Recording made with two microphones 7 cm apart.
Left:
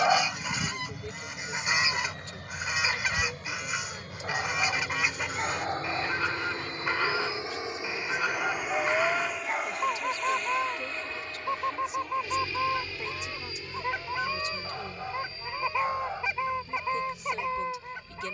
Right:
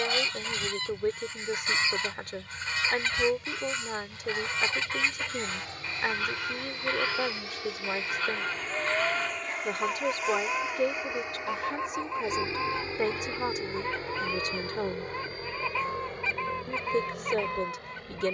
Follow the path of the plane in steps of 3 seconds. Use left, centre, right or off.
left, left, left, centre, right, right.